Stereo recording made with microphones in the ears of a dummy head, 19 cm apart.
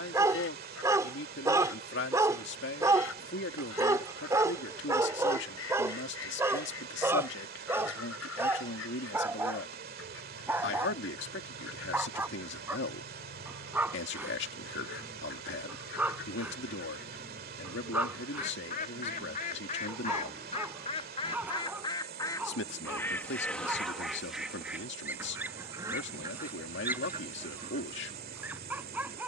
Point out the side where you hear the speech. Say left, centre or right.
left.